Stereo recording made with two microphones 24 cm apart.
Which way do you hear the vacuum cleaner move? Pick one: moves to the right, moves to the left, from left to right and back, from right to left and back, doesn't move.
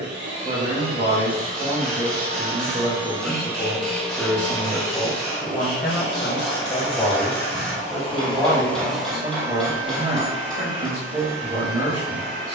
from right to left and back.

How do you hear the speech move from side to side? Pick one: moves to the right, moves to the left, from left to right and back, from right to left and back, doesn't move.
from right to left and back.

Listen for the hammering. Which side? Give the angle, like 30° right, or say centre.
centre.